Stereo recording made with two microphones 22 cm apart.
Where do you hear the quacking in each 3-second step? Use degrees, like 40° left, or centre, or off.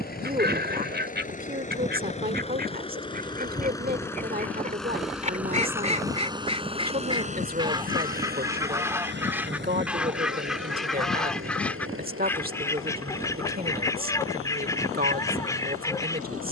50° right, 40° right, 20° right, centre, 10° left, 10° left.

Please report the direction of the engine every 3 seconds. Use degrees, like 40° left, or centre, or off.
30° left, 10° left, 30° right, 60° right, 70° right, 80° right.